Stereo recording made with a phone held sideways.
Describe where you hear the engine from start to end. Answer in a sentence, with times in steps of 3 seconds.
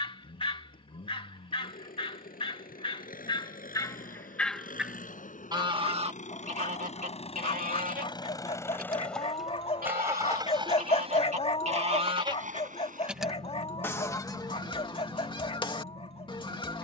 You can hear the engine on the left from 0 s and on the right from 9 s.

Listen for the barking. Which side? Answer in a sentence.
In this clip you hear the barking on the left.